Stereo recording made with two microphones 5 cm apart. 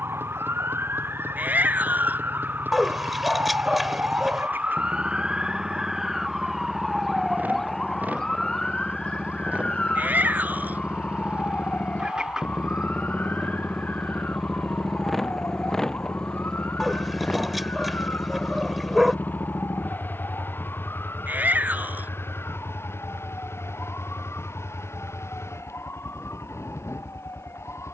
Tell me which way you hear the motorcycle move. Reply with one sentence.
You can hear the motorcycle move to the left.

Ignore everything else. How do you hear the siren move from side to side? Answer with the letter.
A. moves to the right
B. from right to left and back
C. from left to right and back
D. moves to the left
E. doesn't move
D.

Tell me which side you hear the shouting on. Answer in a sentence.
In this clip you hear the shouting on the right.